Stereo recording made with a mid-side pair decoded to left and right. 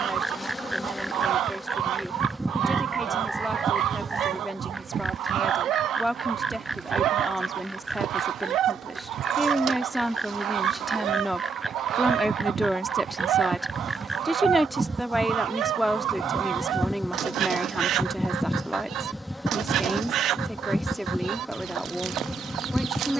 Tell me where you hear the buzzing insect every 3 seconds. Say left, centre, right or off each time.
centre, right, right, right, right, centre, centre, centre.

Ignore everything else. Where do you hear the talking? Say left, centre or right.
centre.